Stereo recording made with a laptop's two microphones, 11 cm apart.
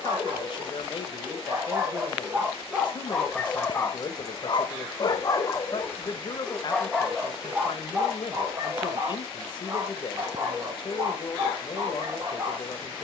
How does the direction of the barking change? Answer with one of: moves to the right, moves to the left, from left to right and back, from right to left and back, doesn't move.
from right to left and back.